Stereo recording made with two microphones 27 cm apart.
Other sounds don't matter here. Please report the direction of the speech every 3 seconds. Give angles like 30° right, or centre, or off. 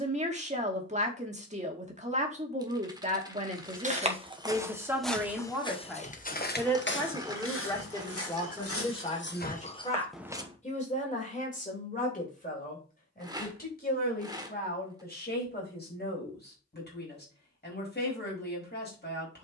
20° right, 10° right, 10° left, 30° left, 30° left, 40° left, 40° left.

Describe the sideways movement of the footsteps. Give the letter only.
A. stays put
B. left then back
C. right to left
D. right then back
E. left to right
B.